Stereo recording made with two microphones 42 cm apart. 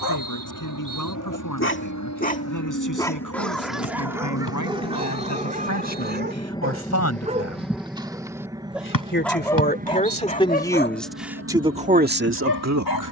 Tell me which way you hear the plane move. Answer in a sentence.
You can hear the plane go from the left side to the right.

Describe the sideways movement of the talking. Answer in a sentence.
You can hear the talking travel towards the right.